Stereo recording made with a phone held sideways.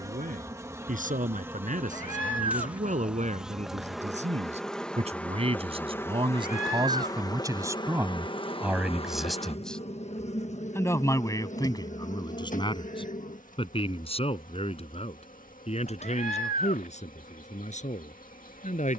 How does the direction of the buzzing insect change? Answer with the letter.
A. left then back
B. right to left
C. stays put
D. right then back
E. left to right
B.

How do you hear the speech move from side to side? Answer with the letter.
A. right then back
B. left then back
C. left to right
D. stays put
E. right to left
E.